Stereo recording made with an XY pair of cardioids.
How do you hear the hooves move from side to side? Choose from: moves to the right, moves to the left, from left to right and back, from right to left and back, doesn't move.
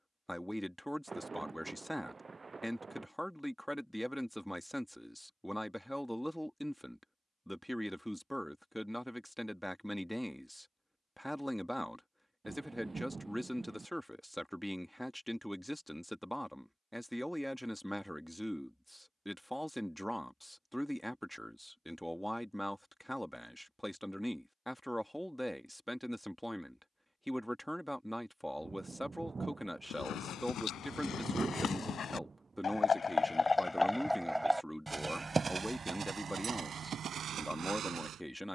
moves to the right.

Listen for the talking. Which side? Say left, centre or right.
centre.